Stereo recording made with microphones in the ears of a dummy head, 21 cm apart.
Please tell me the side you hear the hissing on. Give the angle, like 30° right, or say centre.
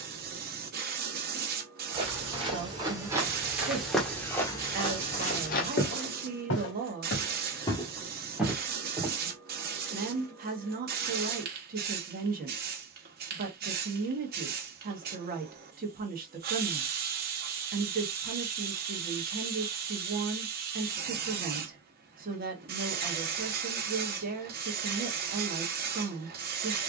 40° right.